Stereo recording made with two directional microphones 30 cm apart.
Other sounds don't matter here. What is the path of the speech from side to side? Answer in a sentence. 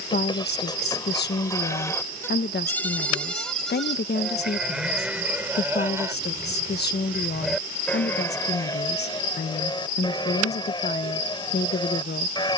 You can hear the speech stay in one place.